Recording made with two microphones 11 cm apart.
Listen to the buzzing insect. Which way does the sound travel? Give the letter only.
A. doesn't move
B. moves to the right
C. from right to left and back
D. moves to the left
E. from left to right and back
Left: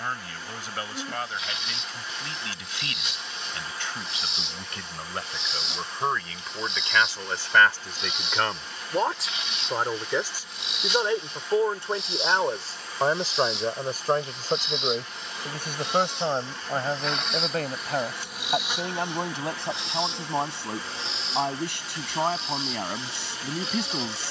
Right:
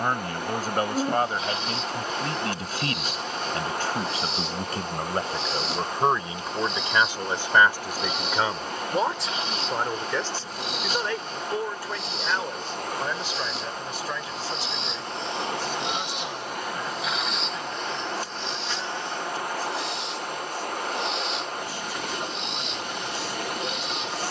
D.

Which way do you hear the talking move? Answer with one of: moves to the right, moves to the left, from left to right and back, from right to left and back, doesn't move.
moves to the left.